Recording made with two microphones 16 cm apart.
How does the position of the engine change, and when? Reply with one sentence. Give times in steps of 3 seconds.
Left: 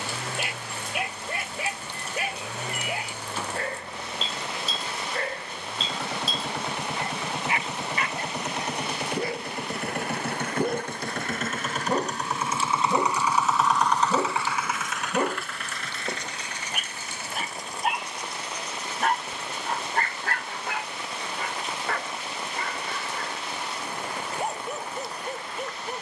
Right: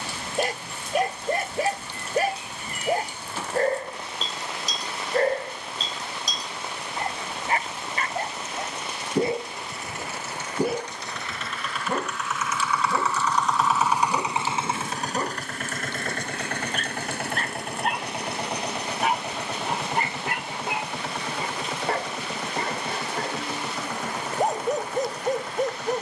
You can hear the engine on the left from 0 s, in the centre from 12 s and on the right from 15 s.